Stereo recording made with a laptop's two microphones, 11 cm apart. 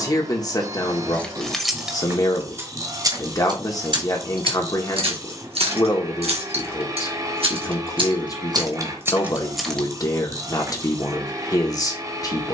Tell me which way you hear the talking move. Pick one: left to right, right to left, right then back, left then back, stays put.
stays put.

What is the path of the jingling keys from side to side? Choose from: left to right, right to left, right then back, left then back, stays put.
right then back.